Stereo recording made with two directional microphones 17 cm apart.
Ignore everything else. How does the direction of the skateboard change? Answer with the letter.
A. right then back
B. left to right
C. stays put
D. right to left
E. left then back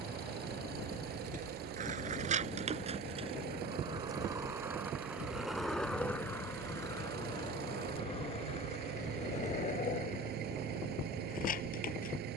D.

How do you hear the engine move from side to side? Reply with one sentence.
In this clip you hear the engine stay put.